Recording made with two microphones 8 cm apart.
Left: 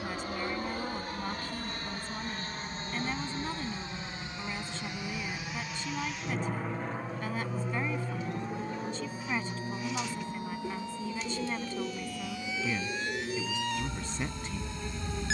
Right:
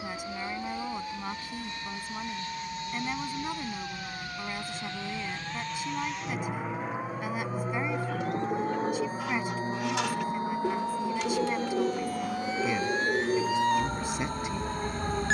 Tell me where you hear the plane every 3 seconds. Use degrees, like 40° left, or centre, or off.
50° left, 20° left, 10° right, 40° right, 60° right.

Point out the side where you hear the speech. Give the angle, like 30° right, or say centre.
10° right.